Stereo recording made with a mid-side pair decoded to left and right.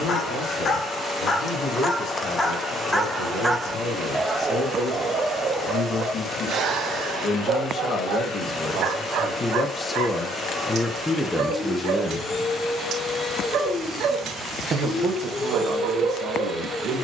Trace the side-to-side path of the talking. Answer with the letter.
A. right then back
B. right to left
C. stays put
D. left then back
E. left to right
E.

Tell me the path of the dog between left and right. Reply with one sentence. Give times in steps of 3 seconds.
You can hear the dog on the left from 0 s and on the right from 3 s.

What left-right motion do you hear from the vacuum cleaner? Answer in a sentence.
In this clip you hear the vacuum cleaner stay in one place.